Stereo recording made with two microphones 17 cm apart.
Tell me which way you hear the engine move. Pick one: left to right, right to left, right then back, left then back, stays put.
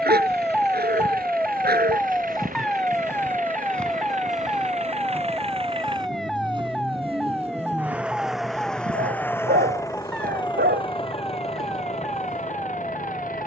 right to left.